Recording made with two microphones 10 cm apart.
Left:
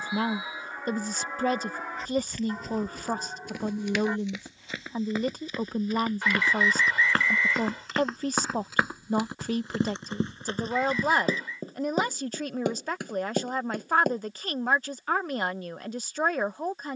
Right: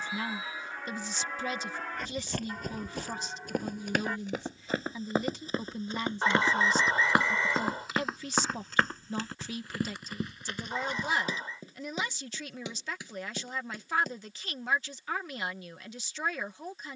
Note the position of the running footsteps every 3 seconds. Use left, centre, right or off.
right, right, centre, left, left, off.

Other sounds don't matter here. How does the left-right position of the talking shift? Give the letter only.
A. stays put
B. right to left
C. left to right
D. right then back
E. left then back
A.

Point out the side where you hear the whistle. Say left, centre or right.
right.